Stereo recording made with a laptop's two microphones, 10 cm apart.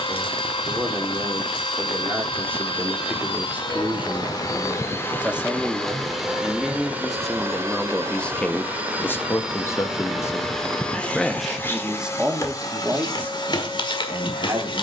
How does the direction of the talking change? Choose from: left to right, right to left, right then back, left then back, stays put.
left then back.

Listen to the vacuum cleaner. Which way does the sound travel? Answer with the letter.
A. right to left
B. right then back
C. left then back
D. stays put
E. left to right
B.